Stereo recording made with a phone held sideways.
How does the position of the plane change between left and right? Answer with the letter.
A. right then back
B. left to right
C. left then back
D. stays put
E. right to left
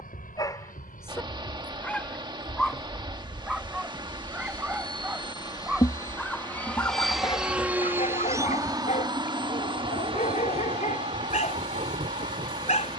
B.